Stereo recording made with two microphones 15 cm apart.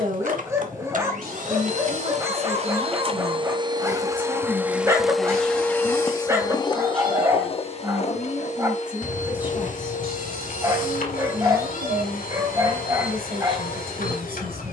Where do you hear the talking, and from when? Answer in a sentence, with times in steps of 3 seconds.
You can hear the talking on the right from 0 s, in the centre from 3 s and on the right from 9 s.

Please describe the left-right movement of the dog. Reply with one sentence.
In this clip you hear the dog stay in one place.